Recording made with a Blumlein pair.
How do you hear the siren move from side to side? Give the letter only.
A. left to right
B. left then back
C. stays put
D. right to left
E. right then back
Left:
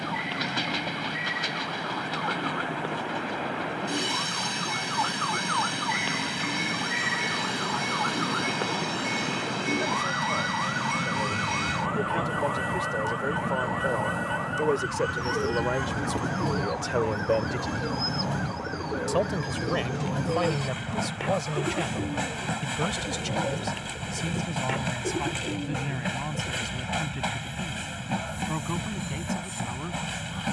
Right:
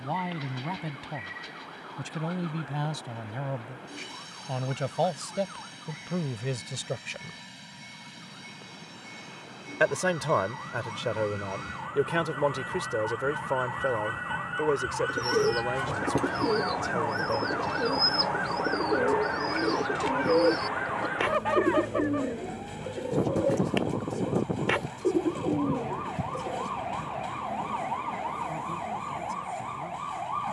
A.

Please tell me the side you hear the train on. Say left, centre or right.
left.